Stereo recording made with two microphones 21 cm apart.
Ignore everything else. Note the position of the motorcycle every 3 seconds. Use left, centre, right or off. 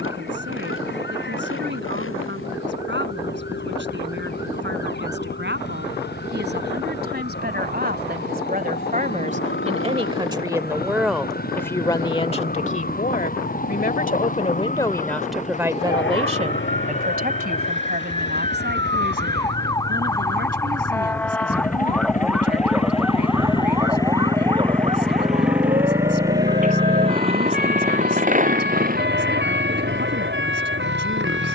left, left, left, left, left, left, left, left, centre, right, right.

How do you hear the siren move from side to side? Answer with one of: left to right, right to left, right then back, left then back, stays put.
left to right.